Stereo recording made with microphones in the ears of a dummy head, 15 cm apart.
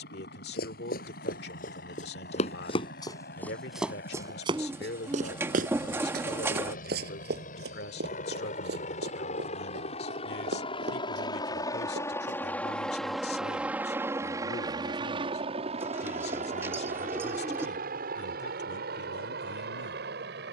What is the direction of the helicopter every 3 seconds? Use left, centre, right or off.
left, left, left, left, centre, right, right.